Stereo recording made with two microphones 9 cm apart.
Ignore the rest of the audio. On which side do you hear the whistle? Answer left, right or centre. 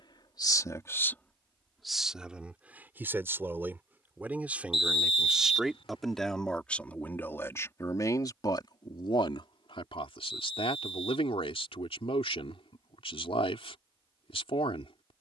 left.